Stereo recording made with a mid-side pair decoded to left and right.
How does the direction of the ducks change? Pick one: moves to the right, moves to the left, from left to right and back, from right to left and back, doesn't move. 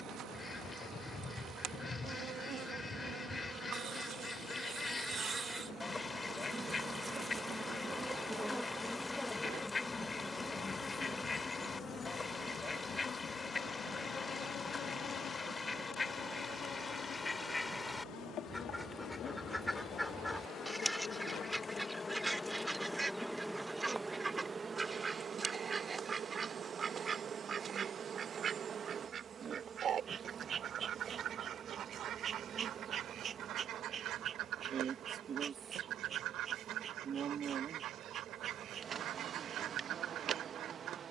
moves to the right.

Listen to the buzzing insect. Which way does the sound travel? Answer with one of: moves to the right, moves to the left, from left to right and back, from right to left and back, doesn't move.
from right to left and back.